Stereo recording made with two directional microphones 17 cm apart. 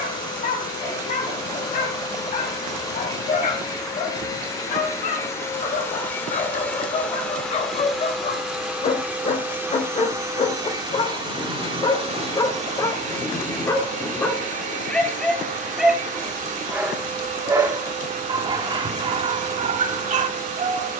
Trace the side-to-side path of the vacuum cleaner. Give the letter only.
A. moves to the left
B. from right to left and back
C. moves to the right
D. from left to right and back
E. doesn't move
C.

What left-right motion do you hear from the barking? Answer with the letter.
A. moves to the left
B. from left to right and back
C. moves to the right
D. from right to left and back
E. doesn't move
C.